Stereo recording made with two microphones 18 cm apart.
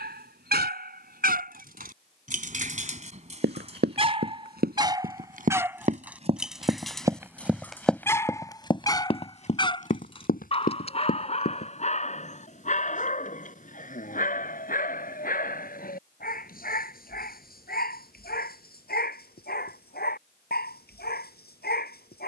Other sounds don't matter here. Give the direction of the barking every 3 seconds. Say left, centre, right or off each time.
right, right, centre, left, left, left, left, left.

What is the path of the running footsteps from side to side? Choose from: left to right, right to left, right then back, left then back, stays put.
right to left.